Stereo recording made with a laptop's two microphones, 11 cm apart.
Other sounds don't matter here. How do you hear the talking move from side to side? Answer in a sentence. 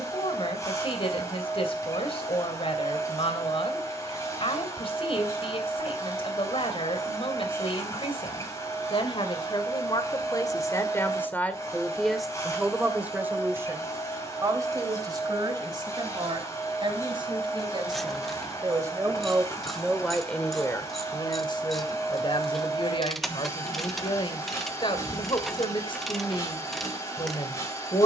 In this clip you hear the talking go right and come back.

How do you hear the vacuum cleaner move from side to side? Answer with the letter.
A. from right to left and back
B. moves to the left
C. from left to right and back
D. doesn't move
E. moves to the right
D.